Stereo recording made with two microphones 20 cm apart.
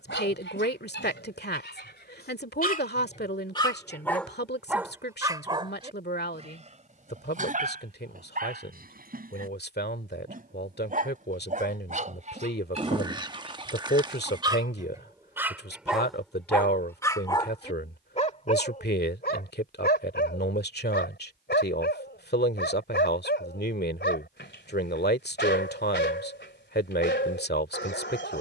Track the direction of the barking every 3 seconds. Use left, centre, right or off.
left, centre, right, right, right, centre, left, left, left, left.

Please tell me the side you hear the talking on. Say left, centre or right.
left.